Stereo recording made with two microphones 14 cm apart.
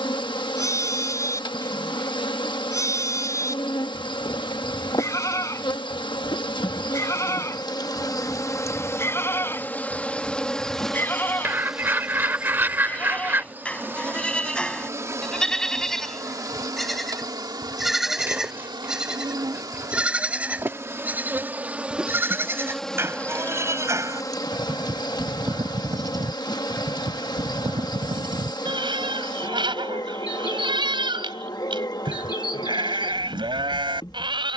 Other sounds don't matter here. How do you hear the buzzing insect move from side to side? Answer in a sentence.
You can hear the buzzing insect move from left to right and back again.